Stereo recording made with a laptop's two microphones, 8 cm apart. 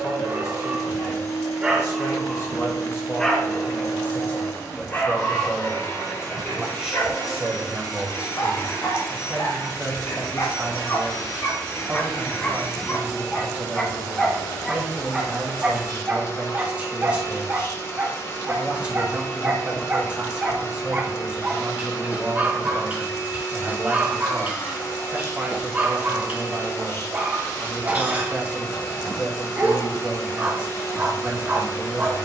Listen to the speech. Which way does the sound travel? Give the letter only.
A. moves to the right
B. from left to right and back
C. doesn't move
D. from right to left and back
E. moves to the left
A.